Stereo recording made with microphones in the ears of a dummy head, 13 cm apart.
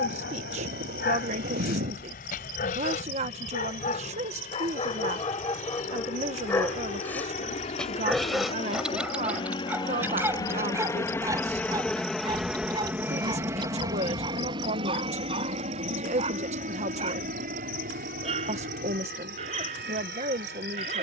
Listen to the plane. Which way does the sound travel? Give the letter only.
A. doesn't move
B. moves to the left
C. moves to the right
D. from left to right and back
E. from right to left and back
C.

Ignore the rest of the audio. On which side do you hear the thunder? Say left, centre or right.
right.